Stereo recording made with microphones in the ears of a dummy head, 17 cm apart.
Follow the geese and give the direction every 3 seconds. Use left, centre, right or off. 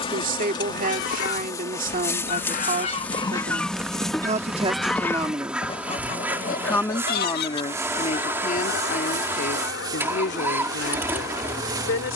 left, centre, left, left.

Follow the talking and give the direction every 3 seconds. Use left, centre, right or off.
right, right, left, left.